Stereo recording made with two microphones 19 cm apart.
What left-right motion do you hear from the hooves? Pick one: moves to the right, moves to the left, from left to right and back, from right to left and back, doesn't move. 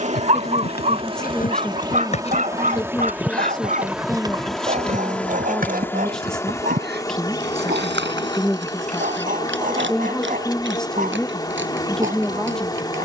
moves to the right.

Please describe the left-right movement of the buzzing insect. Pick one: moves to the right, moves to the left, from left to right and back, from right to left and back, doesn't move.
moves to the left.